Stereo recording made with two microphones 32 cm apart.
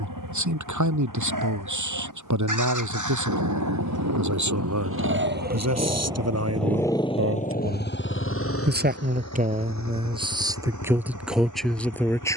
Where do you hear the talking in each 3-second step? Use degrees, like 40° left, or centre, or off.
60° right, 60° right, 40° right, 10° right.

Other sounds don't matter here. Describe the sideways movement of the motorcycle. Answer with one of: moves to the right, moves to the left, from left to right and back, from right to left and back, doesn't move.
moves to the left.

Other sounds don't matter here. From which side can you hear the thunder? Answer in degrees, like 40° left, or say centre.
60° right.